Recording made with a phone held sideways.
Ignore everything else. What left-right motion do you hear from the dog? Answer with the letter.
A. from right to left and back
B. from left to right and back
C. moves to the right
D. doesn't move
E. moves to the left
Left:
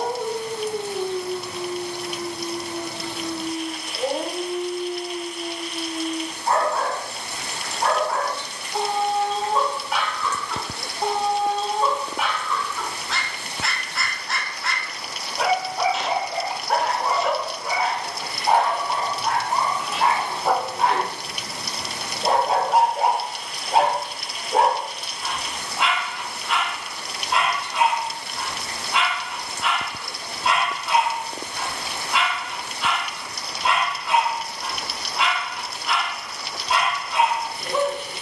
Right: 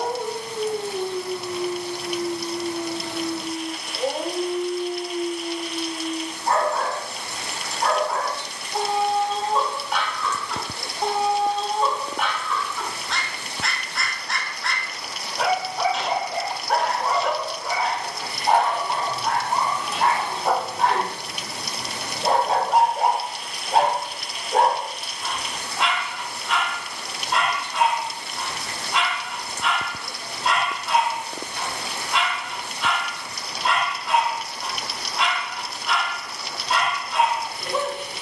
D.